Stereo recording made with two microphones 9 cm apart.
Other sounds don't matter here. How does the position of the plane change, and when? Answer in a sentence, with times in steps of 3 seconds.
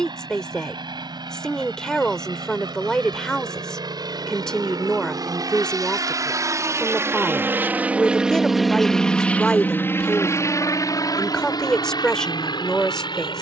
You can hear the plane on the right from 0 s and on the left from 9 s.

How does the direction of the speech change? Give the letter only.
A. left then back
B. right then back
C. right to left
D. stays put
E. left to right
D.